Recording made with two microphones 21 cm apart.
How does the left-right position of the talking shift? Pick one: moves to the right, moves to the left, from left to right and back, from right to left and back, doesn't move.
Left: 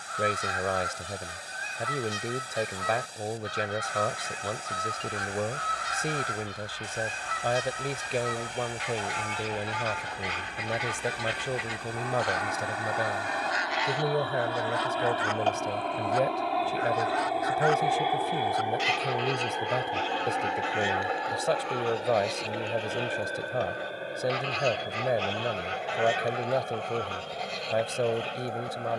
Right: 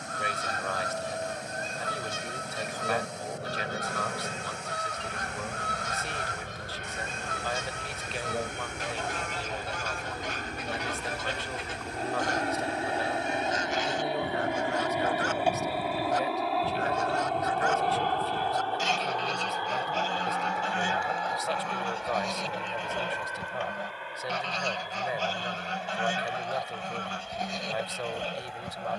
doesn't move.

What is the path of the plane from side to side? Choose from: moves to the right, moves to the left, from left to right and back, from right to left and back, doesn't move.
moves to the left.